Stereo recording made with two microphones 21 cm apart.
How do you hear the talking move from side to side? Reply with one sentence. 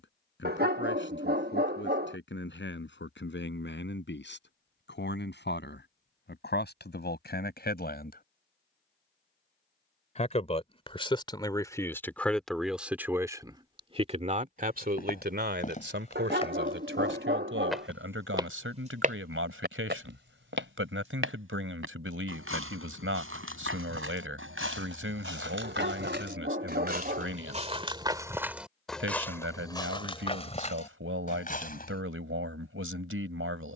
You can hear the talking go from the left side to the right.